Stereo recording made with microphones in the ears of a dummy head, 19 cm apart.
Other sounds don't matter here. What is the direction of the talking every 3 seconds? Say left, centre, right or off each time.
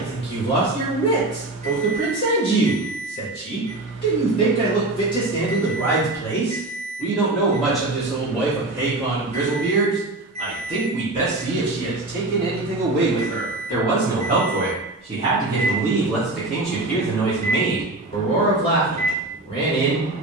left, left, centre, right, right, centre, left.